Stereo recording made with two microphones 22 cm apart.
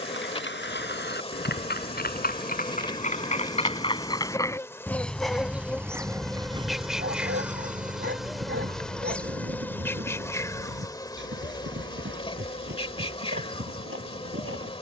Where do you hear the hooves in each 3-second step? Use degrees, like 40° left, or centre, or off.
50° left, 10° left, 30° right, 60° right, 70° right.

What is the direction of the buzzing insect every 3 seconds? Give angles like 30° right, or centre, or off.
30° left, 10° left, centre, 10° left, 30° left.